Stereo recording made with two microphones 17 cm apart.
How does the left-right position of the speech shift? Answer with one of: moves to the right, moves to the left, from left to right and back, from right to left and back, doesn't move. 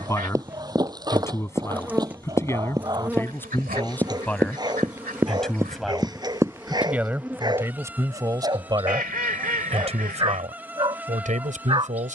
moves to the right.